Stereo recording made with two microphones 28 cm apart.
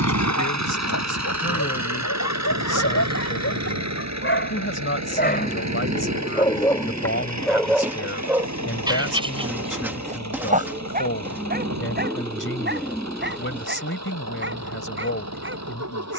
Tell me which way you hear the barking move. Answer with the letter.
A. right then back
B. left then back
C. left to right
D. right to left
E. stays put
C.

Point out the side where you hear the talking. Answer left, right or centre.
left.